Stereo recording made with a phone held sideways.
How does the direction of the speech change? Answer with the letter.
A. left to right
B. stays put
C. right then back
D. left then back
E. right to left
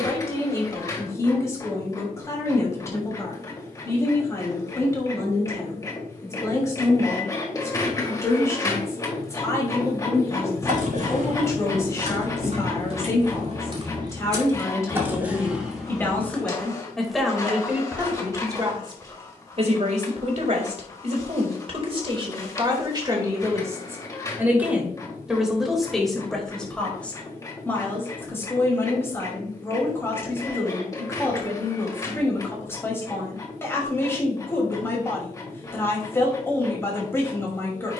C.